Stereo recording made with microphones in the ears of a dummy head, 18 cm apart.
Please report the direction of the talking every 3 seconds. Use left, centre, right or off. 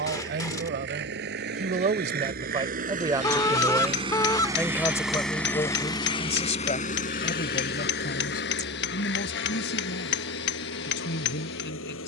right, centre, left, left.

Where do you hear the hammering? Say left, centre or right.
left.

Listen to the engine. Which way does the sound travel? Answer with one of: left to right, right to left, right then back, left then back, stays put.
right to left.